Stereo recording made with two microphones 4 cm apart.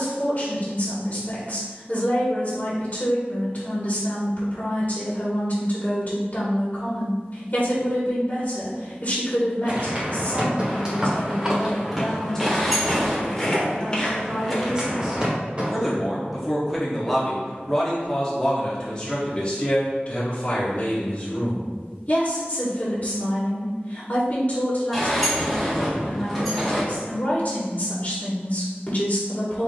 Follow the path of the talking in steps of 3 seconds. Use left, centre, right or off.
left, left, left, left, centre, centre, left, left, left, left.